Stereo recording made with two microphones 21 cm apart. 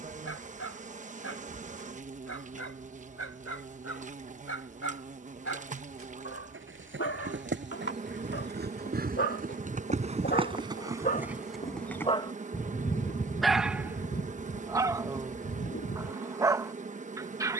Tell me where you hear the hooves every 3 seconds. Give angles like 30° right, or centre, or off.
off, off, 50° right, 20° right, 40° left, 60° left.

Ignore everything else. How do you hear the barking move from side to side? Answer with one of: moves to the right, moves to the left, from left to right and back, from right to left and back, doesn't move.
moves to the right.